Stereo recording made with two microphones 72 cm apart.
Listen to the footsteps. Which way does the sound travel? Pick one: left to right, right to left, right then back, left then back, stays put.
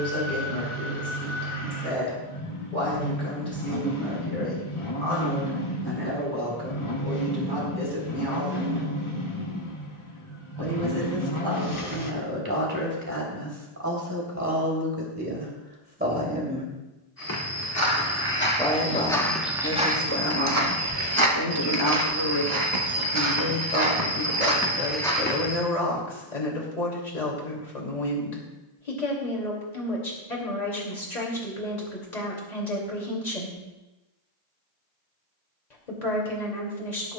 right then back.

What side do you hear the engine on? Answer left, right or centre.
left.